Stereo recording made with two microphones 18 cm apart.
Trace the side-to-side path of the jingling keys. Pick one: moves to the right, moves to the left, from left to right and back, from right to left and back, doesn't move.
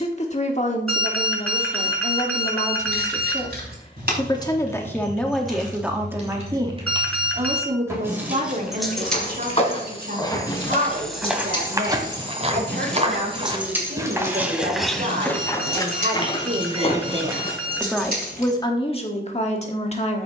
from right to left and back.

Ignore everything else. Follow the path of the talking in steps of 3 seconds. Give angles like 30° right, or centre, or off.
40° left, 20° left, 30° right, 60° right, 70° right, 40° right, 30° left.